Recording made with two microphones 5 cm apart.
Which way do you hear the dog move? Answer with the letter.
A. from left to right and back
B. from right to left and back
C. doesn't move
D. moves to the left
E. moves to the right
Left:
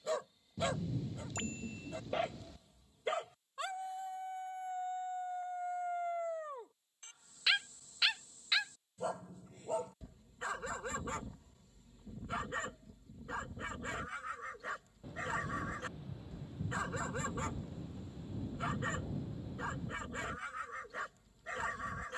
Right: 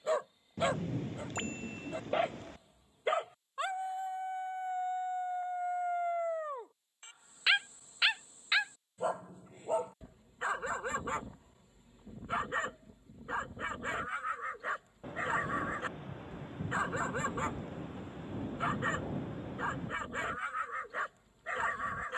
C.